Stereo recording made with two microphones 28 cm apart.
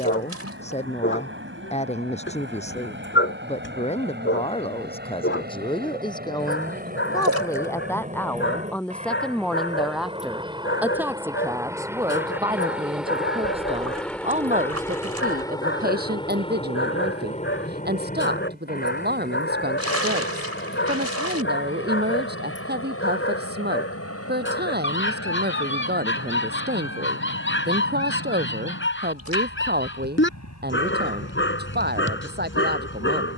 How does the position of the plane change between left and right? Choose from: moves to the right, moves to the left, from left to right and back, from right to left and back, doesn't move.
moves to the left.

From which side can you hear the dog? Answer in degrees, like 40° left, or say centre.
50° left.